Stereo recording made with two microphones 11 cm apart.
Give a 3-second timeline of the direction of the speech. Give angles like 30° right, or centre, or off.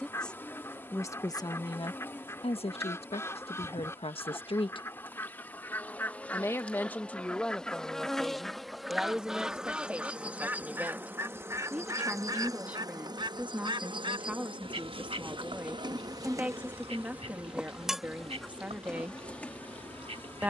40° left, 60° left, 10° left, 10° right, 10° right, 10° right, 10° right.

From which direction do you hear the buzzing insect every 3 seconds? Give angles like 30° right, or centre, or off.
20° left, 20° left, 10° left, 10° right, 40° right, 30° right, 10° left.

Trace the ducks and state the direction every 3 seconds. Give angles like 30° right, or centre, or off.
30° left, 20° left, 10° left, 20° right, 50° right, 70° right, 70° right.